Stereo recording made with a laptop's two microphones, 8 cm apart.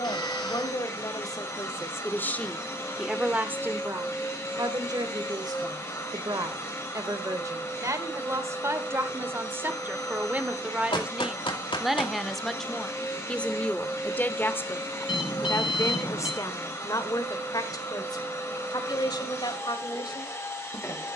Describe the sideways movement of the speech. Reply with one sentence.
You can hear the speech move from left to right and back again.